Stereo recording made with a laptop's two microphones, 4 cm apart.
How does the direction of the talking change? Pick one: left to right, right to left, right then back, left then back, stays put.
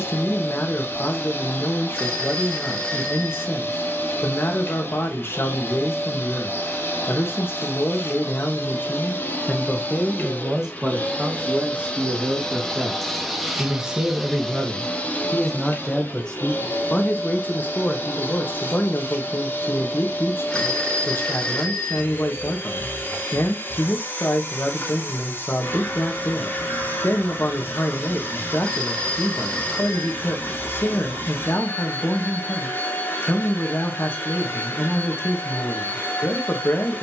right then back.